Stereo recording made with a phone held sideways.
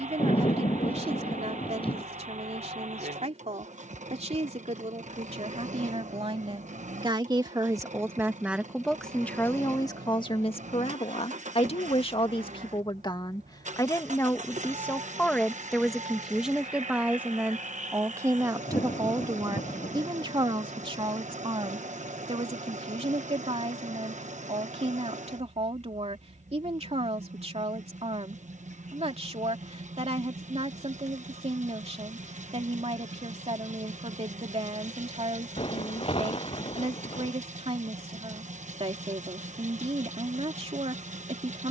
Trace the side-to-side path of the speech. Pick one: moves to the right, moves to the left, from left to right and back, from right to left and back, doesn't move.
from right to left and back.